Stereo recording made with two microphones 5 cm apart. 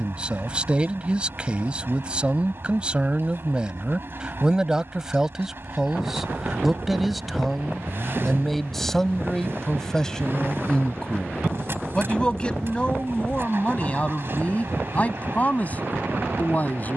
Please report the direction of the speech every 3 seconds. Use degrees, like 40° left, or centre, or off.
20° right, 10° right, centre, 10° left, 20° left, 30° left.